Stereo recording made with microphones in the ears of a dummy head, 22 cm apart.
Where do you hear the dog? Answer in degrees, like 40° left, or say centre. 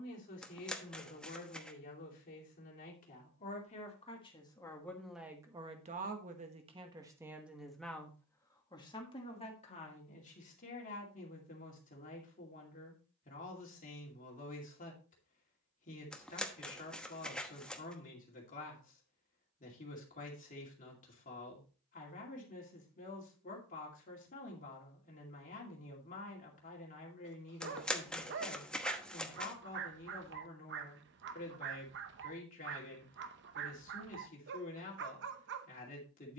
50° right.